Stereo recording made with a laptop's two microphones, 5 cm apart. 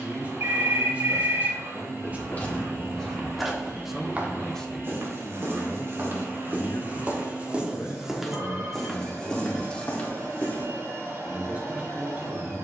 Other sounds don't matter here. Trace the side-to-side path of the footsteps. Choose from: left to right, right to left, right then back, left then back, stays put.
right then back.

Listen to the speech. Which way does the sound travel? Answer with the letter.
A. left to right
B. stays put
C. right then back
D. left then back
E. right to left
D.